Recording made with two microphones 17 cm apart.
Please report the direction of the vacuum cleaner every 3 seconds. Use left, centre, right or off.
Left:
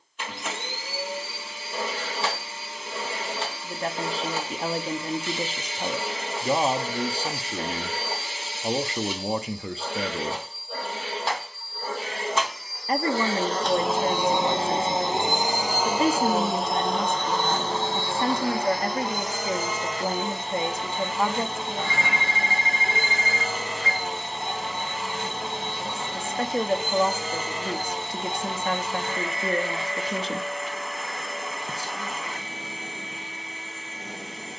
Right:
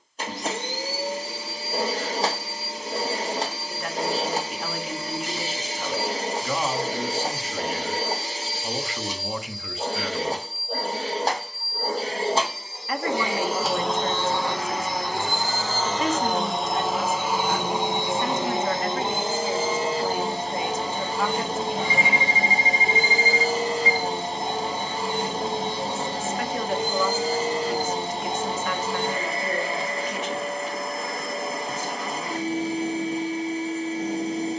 right, right, right, right, centre, centre, right, right, right, right, right, right.